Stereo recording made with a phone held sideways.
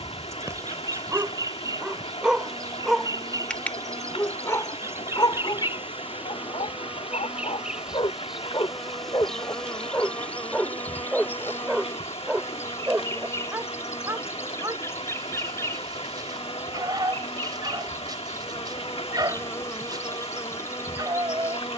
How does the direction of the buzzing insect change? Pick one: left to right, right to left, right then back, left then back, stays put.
right to left.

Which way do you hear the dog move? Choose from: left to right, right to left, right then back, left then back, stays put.
left then back.